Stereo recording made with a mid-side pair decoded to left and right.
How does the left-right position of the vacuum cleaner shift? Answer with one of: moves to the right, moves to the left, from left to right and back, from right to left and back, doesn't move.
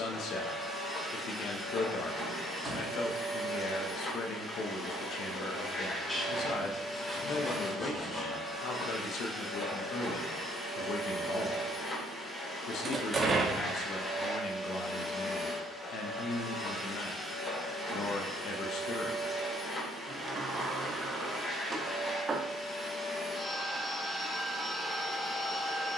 doesn't move.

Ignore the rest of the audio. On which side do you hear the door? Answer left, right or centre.
right.